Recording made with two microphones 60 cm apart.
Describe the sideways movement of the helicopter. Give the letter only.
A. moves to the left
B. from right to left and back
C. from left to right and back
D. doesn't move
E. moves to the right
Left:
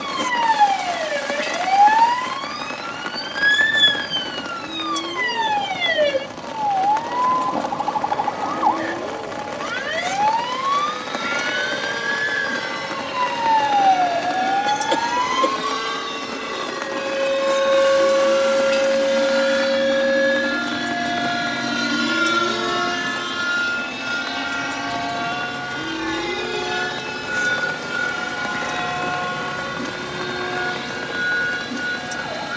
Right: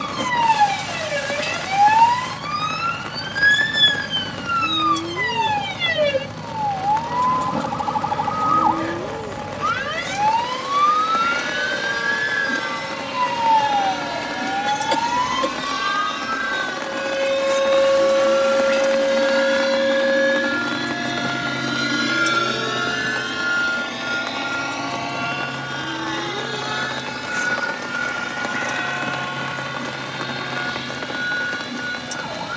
A.